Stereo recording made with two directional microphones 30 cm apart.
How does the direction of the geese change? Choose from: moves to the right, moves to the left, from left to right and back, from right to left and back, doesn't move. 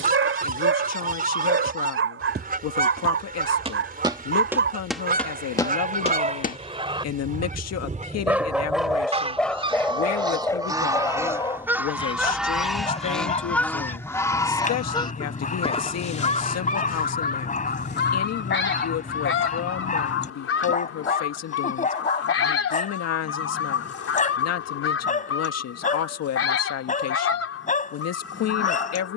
moves to the left.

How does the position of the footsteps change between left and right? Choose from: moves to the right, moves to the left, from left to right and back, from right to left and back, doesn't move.
moves to the left.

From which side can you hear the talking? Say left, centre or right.
left.